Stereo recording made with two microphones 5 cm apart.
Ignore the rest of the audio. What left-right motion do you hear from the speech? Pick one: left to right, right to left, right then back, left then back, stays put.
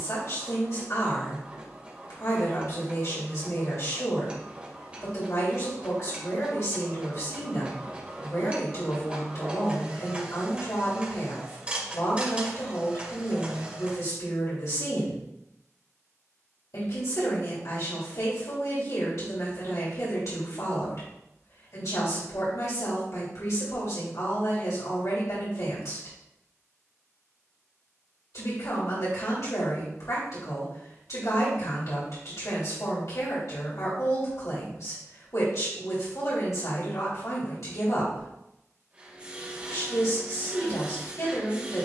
stays put.